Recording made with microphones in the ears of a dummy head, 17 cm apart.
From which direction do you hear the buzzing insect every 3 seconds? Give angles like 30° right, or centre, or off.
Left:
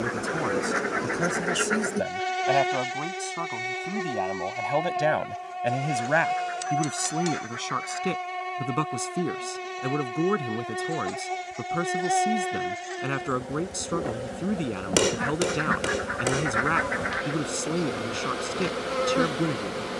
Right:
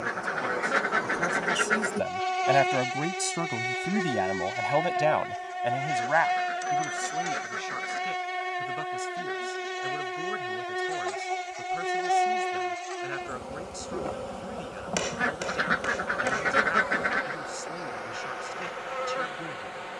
20° left, 10° right, 10° right, centre, 10° left, 30° left, 50° left.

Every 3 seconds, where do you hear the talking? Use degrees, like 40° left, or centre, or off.
20° left, centre, 60° left, 70° left, 70° left, 70° left, 70° left.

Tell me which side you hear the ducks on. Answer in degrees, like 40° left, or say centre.
40° right.